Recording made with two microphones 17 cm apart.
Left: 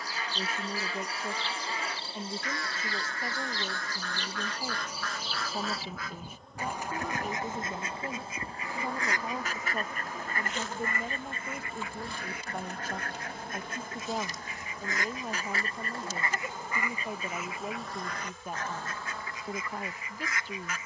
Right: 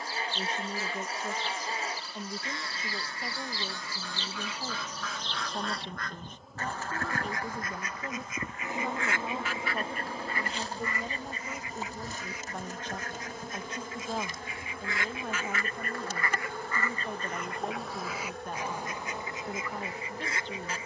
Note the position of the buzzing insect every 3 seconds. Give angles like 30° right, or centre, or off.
30° left, 10° left, 10° right, 30° right, 50° right, 60° right, 70° right.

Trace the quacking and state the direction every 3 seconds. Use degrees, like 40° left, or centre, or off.
30° right, 10° right, 20° left, 50° left, 60° left, 20° left, 20° right.